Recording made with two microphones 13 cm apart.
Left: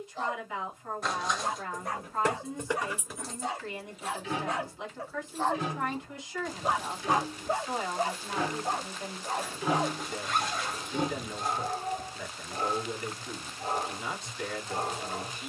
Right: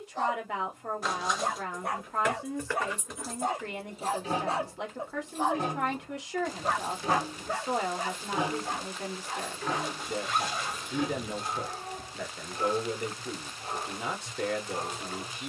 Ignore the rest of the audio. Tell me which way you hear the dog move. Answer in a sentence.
You can hear the dog move to the left.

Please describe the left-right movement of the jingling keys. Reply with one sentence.
In this clip you hear the jingling keys move from left to right and back again.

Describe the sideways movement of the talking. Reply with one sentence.
You can hear the talking stay in one place.